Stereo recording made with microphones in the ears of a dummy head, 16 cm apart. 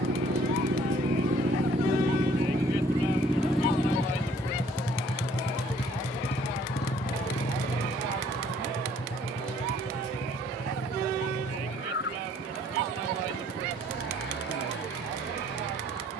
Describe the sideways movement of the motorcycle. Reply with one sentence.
You can hear the motorcycle travel towards the left.